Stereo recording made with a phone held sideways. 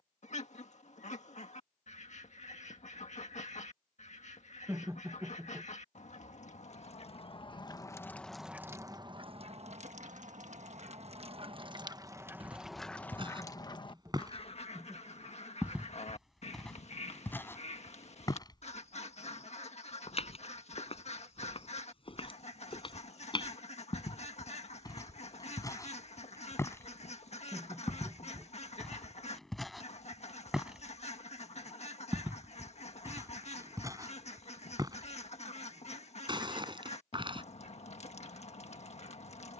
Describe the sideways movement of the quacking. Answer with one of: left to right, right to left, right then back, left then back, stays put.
right then back.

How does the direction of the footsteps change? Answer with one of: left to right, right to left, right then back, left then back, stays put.
left then back.